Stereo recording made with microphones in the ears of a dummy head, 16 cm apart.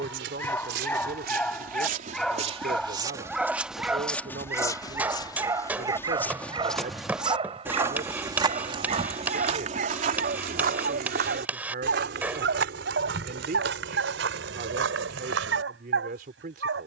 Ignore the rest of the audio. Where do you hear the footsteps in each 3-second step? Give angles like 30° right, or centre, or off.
50° right, 10° left, 10° right, 50° right, 70° right, 70° right.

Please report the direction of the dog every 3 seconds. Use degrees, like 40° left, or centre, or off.
10° left, 10° right, 30° right, 50° right, 70° right, 70° right.